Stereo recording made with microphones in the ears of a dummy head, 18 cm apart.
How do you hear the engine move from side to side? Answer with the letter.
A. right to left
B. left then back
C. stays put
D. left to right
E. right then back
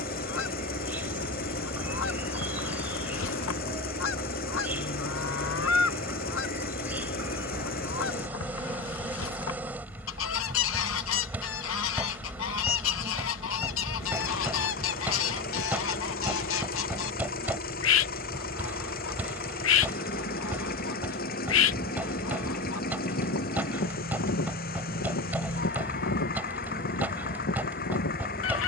C.